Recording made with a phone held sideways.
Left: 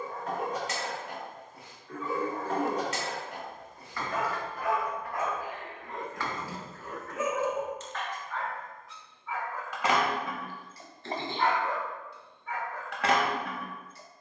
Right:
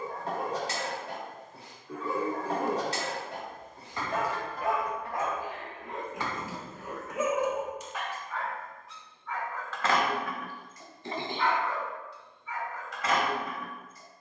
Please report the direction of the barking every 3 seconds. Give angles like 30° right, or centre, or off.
30° right, 30° right, 10° right, 30° left, 70° left.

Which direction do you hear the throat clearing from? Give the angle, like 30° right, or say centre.
10° right.